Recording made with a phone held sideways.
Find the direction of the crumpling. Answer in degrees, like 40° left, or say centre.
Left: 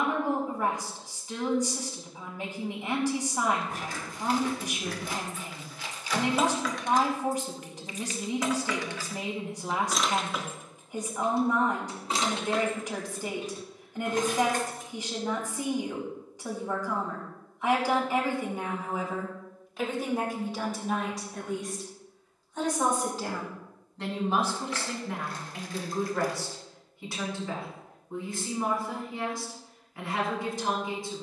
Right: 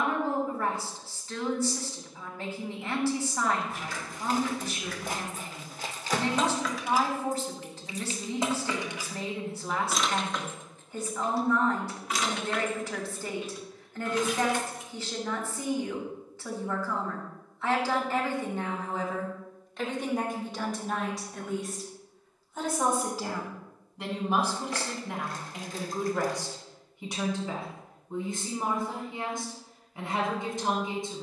40° right.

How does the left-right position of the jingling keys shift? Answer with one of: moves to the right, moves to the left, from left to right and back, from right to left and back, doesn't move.
from left to right and back.